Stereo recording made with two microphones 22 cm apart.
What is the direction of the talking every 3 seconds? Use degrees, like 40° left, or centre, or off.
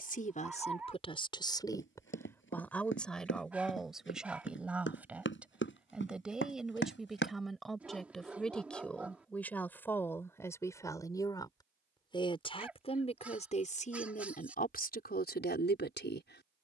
20° left, centre, centre, 10° left, 30° left, 50° left.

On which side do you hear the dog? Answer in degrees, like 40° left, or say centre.
10° right.